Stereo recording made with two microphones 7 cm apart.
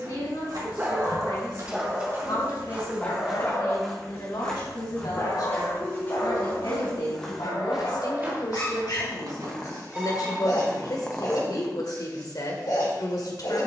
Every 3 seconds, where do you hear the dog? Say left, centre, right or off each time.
centre, left, left, left, left.